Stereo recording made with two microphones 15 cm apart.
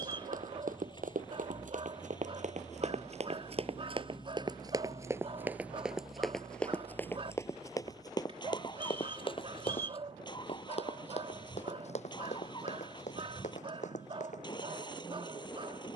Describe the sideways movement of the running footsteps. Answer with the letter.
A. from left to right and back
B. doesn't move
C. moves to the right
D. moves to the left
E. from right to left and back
D.